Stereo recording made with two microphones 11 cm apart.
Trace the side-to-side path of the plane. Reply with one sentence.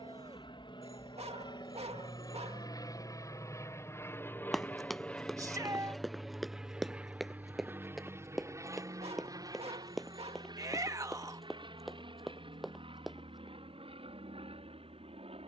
In this clip you hear the plane move to the right.